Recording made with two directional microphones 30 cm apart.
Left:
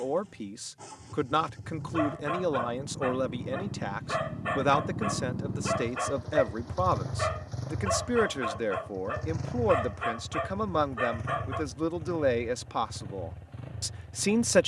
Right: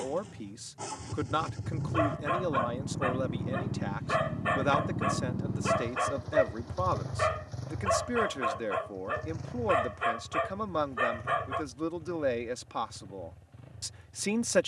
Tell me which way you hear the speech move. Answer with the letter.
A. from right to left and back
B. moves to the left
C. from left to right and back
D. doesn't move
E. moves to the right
D.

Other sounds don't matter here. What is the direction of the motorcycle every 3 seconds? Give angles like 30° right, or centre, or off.
50° right, 20° right, 20° left, 50° left, 60° left.